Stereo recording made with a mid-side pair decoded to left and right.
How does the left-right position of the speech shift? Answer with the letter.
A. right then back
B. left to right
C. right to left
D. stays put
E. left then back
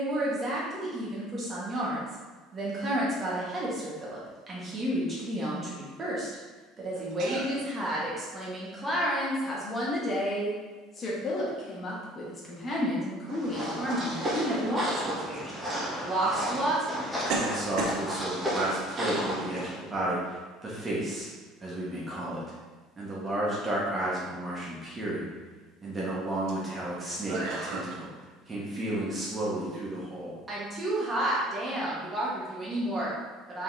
E.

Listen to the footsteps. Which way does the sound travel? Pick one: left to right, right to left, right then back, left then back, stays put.
left then back.